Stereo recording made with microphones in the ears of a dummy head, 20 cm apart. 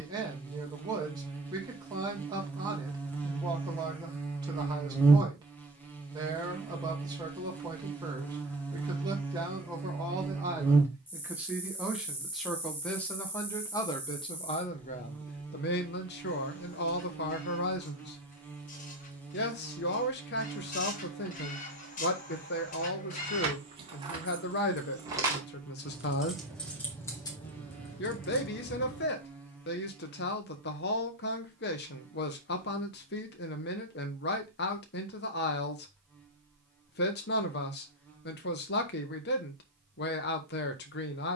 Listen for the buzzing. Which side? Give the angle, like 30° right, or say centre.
10° left.